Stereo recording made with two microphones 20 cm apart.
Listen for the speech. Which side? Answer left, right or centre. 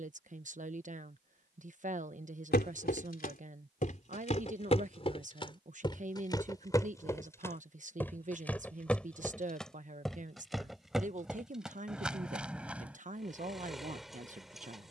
right.